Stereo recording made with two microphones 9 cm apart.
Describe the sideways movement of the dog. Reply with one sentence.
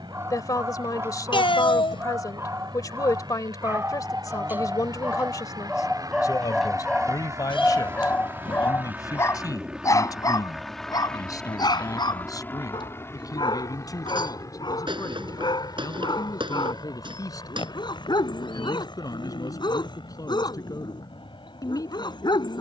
In this clip you hear the dog move to the left.